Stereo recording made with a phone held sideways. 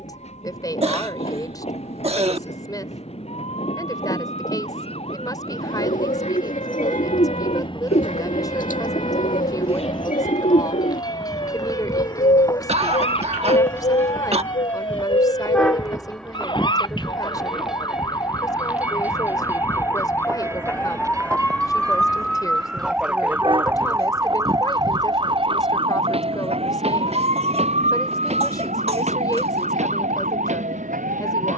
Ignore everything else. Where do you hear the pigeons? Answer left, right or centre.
left.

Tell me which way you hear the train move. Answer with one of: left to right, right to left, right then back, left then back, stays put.
left to right.